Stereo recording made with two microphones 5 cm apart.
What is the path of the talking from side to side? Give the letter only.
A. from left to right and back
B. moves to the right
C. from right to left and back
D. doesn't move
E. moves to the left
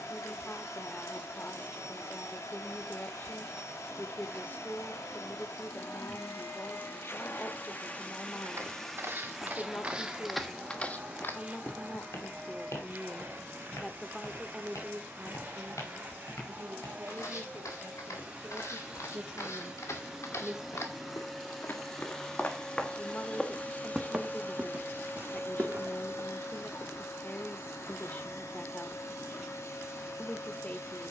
A.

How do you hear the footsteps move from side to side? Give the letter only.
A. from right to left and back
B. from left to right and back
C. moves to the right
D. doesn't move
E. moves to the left
A.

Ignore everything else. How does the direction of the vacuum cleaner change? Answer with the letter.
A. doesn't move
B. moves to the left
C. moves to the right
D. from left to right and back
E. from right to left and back
D.